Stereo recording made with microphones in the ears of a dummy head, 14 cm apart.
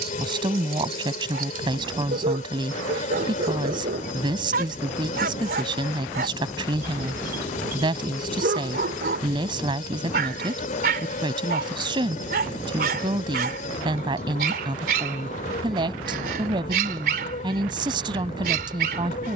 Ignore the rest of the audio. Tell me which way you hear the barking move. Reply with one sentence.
In this clip you hear the barking stay in one place.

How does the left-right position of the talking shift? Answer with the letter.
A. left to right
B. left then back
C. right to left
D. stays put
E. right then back
D.